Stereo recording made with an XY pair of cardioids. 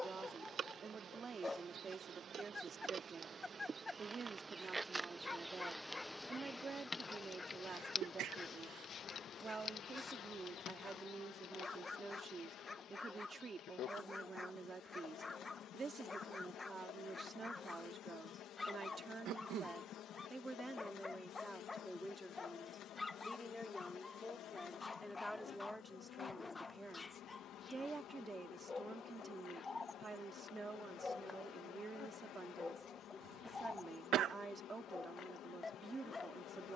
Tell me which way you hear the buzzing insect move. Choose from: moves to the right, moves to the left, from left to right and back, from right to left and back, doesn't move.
moves to the left.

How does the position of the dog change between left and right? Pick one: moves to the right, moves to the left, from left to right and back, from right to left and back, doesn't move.
doesn't move.